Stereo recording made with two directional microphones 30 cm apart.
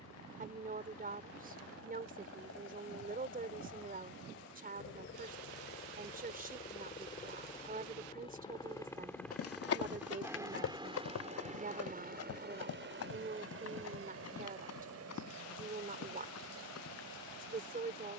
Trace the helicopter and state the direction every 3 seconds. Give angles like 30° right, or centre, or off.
60° left, 50° left, 20° left, 10° right, 40° right, 60° right.